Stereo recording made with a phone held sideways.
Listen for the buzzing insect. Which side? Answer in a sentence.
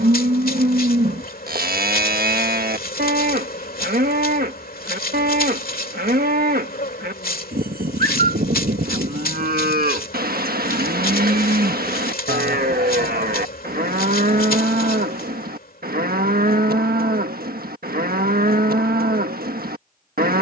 You can hear the buzzing insect on the left.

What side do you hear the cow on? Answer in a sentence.
You can hear the cow on the right.